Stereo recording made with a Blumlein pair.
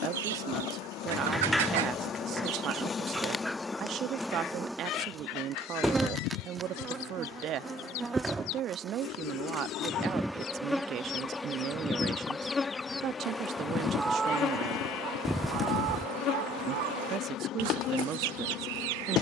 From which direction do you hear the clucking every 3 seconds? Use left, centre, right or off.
right, left, left, left, centre, right, right.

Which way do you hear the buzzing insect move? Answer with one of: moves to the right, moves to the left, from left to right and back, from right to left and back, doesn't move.
from left to right and back.